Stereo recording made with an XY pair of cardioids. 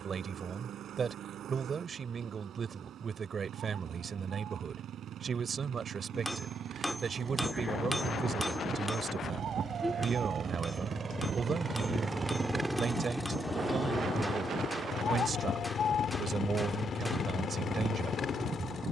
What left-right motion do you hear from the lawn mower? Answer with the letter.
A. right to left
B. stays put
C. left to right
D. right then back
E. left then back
A.